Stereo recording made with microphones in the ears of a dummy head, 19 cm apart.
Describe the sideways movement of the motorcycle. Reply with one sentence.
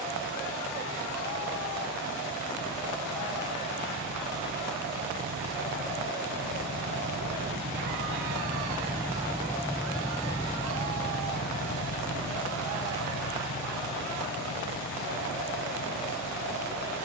In this clip you hear the motorcycle go from the right side to the left.